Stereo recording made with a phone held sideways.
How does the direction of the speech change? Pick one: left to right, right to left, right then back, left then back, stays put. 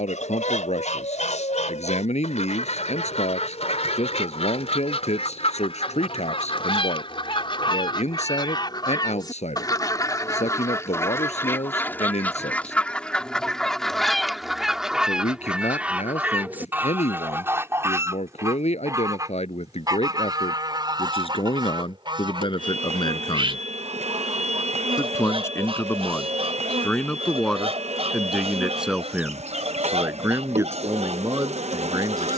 left to right.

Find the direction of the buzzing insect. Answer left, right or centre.
right.